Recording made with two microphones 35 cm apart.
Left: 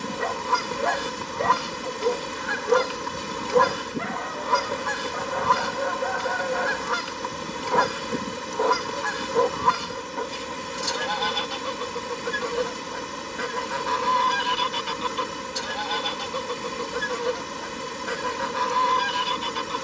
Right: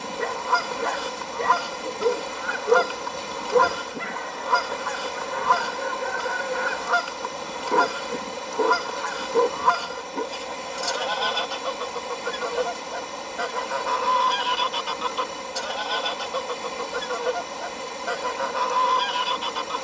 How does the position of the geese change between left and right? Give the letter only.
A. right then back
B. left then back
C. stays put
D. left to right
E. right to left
C.